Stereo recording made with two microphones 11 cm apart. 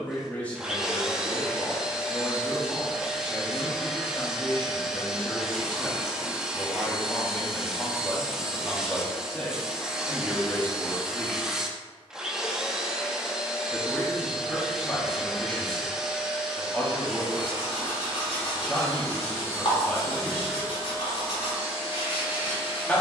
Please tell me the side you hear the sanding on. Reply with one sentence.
In this clip you hear the sanding on the left.